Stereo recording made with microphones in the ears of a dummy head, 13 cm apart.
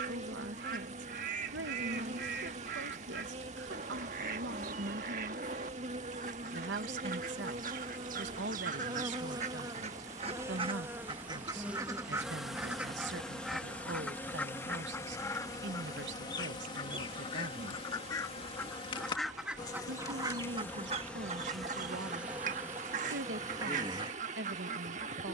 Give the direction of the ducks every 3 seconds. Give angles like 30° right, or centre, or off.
60° right, 60° right, 60° right, 40° right, centre, 30° left, 10° right, 50° right, 50° right.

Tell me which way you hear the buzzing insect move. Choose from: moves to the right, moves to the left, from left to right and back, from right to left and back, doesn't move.
from right to left and back.